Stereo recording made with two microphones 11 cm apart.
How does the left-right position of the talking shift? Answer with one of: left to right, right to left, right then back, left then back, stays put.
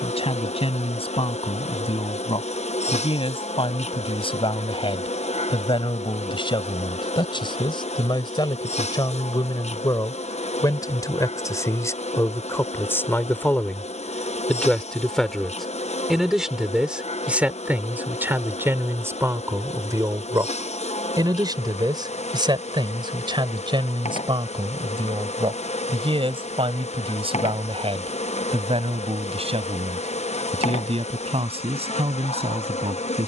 left to right.